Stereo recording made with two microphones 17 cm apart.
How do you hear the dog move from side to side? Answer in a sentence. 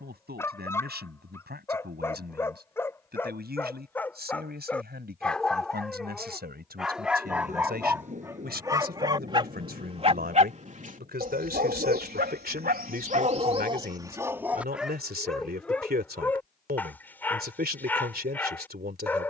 You can hear the dog move from left to right and back again.